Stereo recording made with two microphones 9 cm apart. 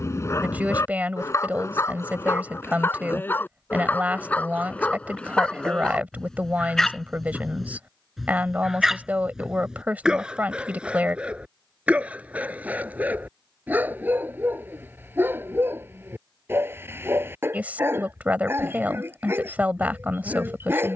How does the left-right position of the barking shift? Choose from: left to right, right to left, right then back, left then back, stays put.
left to right.